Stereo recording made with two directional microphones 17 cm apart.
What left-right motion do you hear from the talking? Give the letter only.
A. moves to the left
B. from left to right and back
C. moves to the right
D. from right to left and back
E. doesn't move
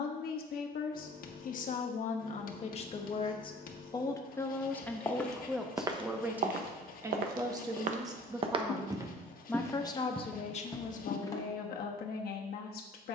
B.